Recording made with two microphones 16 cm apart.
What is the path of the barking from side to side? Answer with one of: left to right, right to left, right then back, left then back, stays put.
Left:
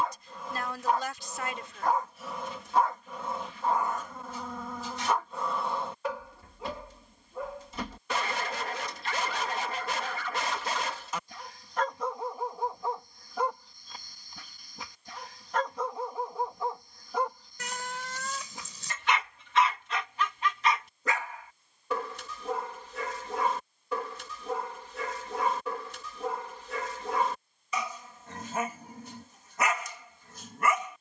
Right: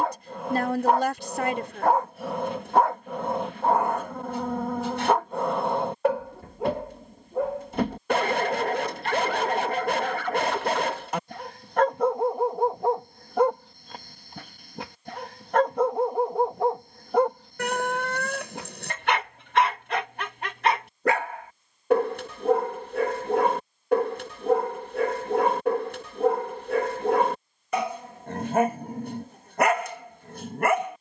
stays put.